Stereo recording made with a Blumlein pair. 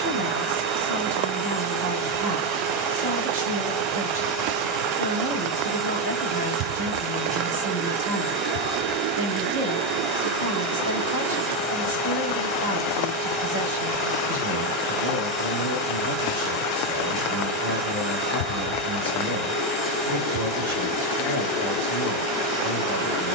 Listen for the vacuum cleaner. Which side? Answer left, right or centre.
right.